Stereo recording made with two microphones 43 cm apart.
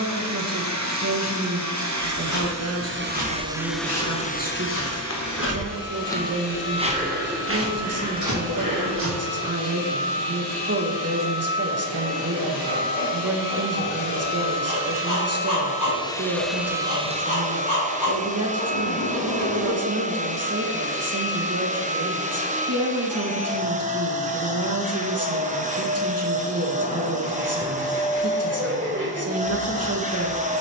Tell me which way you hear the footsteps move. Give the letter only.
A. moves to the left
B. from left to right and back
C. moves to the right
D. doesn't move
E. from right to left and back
C.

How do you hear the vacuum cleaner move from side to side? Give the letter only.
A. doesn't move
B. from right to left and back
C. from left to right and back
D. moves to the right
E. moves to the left
B.